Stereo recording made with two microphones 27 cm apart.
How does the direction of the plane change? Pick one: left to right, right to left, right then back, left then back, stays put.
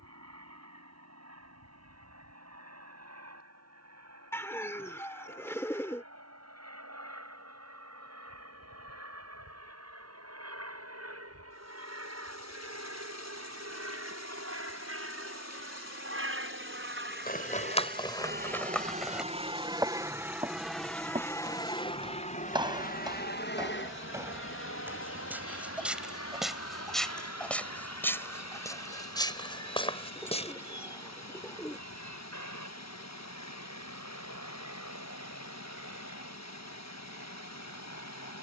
right to left.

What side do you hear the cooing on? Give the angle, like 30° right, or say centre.
10° left.